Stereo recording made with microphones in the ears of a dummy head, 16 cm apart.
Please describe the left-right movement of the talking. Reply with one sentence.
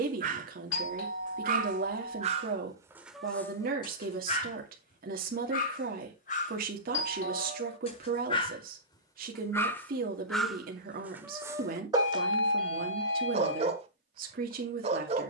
You can hear the talking stay put.